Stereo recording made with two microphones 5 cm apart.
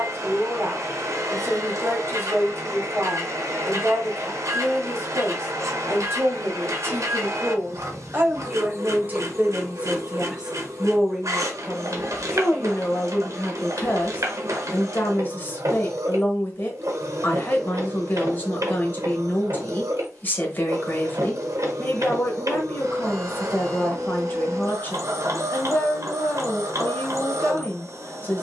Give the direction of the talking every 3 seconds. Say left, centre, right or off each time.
right, right, right, centre, left, left, left, left, left, left.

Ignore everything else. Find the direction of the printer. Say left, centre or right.
right.